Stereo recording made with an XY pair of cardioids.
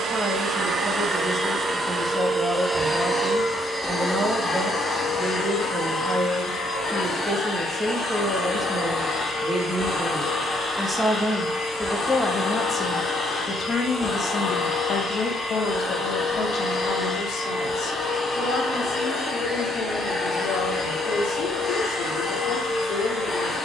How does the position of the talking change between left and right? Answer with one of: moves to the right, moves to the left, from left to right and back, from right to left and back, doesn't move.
moves to the left.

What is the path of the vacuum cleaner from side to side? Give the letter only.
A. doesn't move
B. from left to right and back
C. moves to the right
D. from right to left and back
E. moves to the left
E.